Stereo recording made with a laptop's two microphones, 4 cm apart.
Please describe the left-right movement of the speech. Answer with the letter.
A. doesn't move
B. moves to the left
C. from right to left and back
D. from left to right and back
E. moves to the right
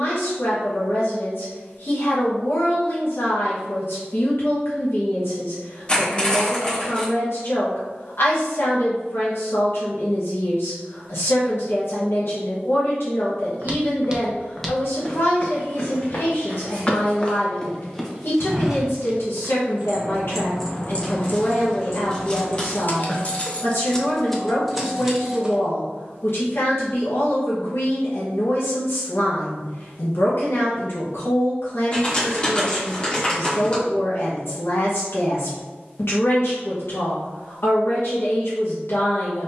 A.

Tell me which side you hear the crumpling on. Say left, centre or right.
left.